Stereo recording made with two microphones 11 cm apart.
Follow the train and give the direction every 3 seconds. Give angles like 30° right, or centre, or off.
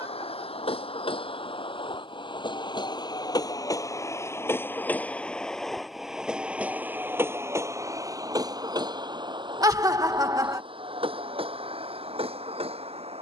50° left, 20° left, 20° right, 50° right, 60° right.